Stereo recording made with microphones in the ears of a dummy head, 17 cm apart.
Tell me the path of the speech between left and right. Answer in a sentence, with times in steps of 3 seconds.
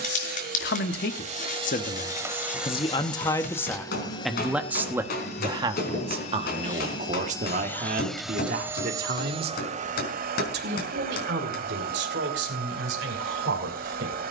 You can hear the speech on the left from 0 s, in the centre from 3 s and on the right from 6 s.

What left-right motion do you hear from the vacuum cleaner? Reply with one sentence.
In this clip you hear the vacuum cleaner go left and come back.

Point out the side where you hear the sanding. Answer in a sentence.
You can hear the sanding on the left.